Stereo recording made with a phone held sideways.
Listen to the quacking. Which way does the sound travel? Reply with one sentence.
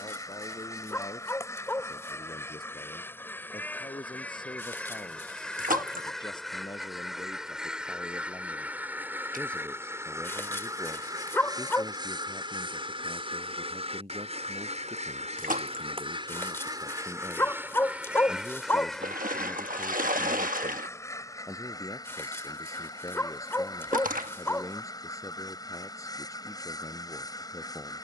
You can hear the quacking go right and come back.